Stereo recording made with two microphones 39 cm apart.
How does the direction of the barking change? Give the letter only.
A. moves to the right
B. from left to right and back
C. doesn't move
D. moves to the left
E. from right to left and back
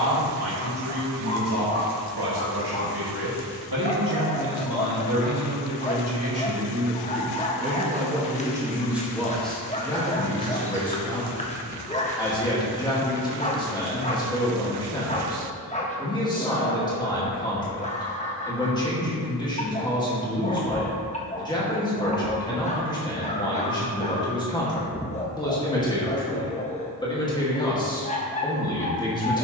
C.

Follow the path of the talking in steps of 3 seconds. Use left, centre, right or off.
right, right, right, centre, centre, centre, centre, centre, centre, centre.